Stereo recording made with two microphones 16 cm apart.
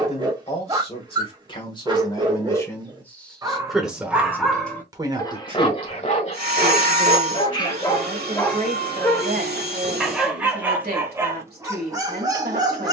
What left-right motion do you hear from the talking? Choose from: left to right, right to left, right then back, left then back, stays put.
left to right.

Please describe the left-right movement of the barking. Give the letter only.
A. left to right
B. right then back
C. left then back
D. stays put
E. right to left
C.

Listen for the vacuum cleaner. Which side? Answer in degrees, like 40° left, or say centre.
70° right.